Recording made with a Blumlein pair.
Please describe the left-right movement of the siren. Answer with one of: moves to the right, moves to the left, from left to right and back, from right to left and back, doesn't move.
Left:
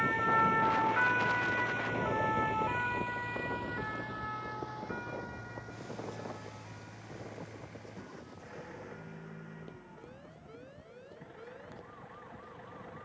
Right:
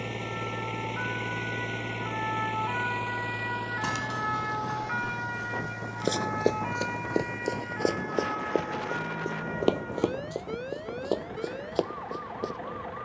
moves to the right.